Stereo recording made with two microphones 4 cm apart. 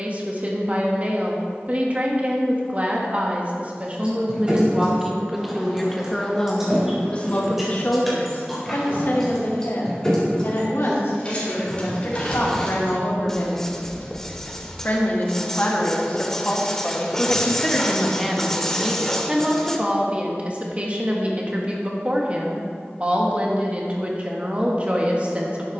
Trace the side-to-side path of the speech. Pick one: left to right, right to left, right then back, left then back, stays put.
left then back.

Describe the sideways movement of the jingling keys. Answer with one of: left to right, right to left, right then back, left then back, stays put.
right to left.